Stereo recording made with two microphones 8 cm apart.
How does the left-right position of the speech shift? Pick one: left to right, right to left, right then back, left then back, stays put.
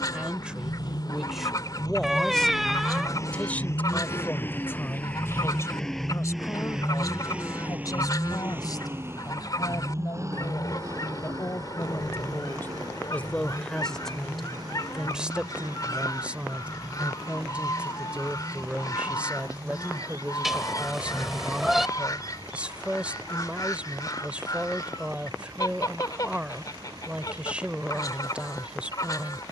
left then back.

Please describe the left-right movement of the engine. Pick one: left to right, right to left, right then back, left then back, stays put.
left to right.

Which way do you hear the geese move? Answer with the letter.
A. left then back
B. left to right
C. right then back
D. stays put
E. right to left
D.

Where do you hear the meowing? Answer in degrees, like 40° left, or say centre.
centre.